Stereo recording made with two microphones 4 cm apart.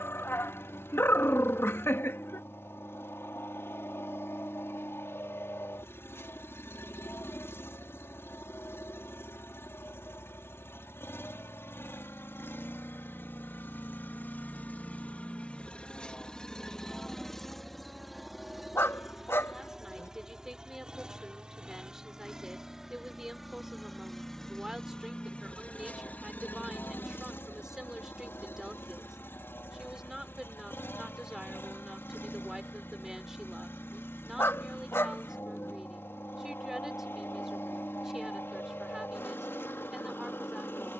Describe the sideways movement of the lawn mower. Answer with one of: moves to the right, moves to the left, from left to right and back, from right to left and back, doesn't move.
from left to right and back.